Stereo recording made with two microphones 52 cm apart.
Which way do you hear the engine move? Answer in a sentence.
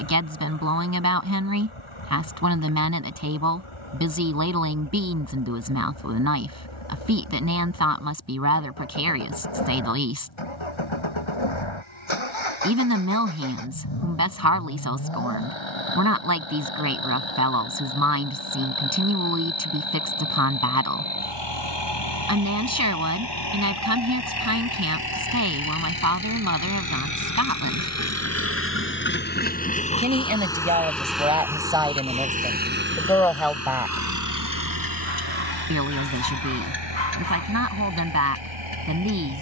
In this clip you hear the engine go from the left side to the right.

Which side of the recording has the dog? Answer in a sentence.
In this clip you hear the dog on the left.